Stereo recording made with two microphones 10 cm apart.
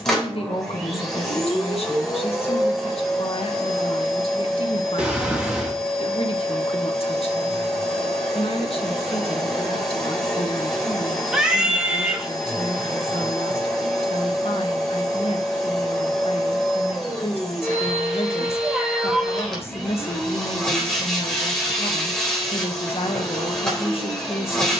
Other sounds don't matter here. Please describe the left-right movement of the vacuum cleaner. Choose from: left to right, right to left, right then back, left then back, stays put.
stays put.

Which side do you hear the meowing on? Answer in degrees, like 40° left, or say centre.
10° right.